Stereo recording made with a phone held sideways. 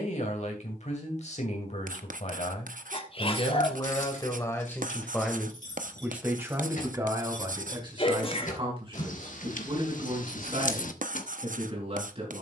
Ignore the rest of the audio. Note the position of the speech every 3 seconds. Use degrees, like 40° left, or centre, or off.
60° left, 20° left, 30° right, 50° right.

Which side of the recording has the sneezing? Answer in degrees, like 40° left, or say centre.
40° left.